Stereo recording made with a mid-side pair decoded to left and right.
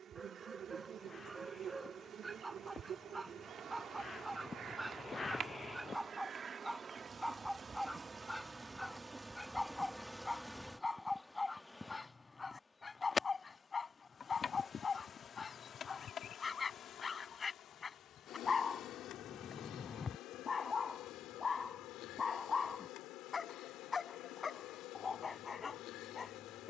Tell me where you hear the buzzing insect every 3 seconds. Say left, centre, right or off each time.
right, right, right, centre, left, left, left, left, left.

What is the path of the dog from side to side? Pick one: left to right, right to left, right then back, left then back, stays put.
right to left.